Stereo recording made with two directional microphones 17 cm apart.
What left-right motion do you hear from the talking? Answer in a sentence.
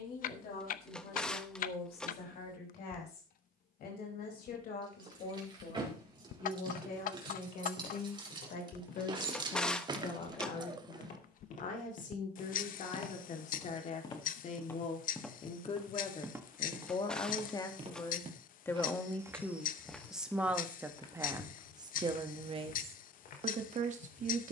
You can hear the talking travel towards the right.